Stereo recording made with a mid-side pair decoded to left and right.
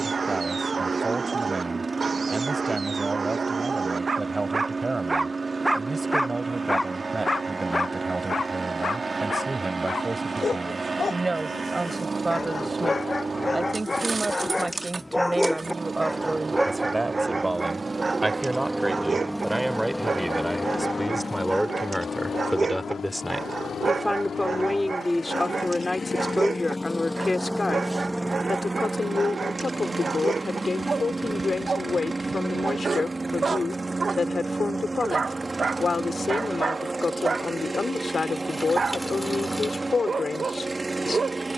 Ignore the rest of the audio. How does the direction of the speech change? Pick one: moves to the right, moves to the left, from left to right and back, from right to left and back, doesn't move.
moves to the left.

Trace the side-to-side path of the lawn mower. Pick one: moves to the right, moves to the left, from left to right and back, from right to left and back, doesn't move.
from right to left and back.